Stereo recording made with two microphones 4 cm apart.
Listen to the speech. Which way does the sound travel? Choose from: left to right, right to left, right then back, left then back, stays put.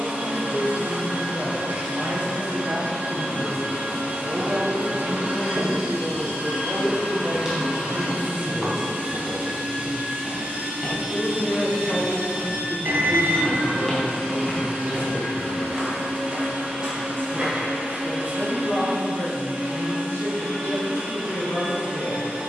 right to left.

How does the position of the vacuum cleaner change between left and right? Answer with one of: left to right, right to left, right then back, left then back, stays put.
stays put.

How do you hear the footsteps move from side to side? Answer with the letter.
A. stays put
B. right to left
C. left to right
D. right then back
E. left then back
E.